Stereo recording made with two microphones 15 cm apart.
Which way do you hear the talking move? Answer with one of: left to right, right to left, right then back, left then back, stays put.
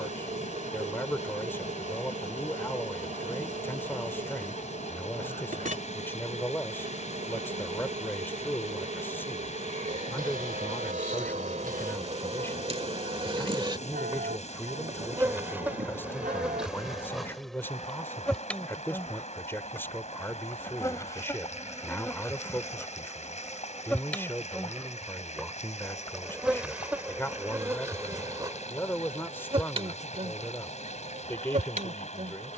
stays put.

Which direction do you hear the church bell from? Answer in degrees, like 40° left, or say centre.
70° right.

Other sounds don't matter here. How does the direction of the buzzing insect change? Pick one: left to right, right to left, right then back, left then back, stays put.
left then back.